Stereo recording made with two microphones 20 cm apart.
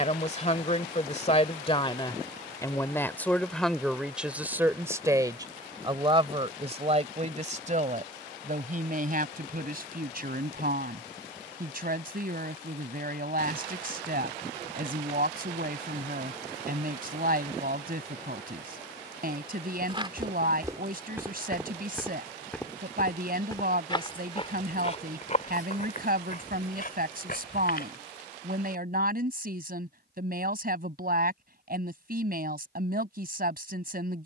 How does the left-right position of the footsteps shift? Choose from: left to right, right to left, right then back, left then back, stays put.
right to left.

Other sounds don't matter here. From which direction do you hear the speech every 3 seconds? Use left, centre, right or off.
left, centre, right, right, right, right, right, right, right, right, right, right.